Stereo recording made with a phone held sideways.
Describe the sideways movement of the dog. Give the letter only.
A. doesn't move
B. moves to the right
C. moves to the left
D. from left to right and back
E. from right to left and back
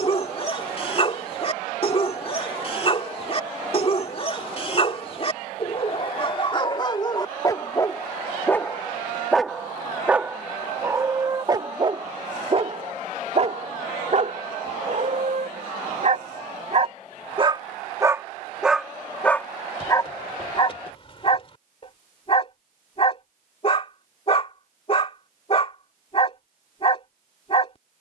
D.